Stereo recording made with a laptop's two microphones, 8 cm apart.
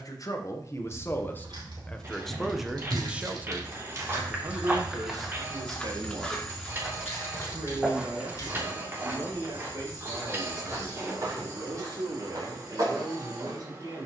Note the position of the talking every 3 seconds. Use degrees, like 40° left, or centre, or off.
20° left, 40° right, 60° right, 70° right, 70° right.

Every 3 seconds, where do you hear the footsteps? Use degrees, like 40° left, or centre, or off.
50° right, 10° right, 10° right, 40° right, 50° right.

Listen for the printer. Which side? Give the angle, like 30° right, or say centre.
30° right.